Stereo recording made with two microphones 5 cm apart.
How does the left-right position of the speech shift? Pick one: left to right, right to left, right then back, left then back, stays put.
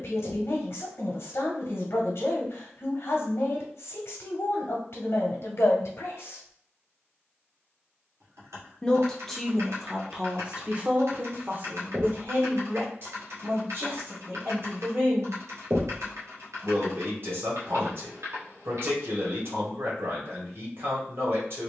left to right.